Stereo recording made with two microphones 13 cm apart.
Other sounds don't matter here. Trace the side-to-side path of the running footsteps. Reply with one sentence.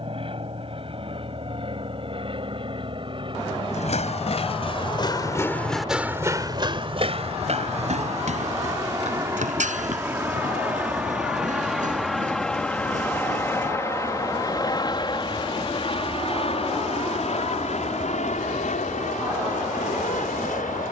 In this clip you hear the running footsteps move to the right.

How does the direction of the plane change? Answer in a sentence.
In this clip you hear the plane move to the left.